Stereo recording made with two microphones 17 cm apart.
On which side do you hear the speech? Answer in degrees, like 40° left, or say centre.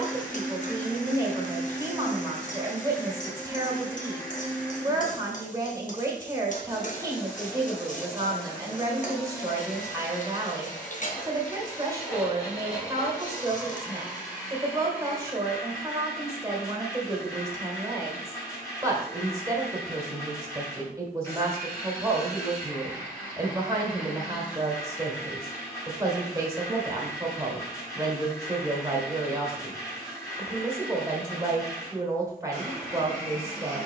20° right.